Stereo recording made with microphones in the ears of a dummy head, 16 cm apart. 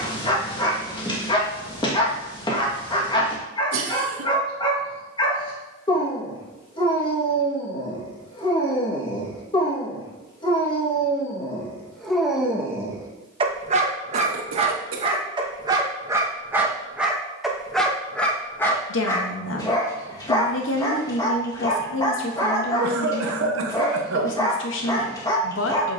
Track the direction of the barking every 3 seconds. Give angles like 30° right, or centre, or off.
20° left, 20° left, 20° left, 20° left, 20° right, 10° right, 20° left, 20° left, 20° left.